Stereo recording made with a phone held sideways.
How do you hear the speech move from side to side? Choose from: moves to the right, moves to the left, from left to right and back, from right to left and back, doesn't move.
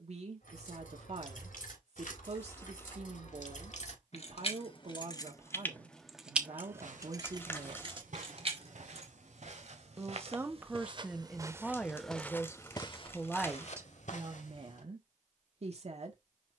from right to left and back.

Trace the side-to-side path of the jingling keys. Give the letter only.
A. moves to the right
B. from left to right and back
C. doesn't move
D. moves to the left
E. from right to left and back
A.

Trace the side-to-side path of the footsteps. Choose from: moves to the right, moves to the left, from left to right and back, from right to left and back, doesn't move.
moves to the left.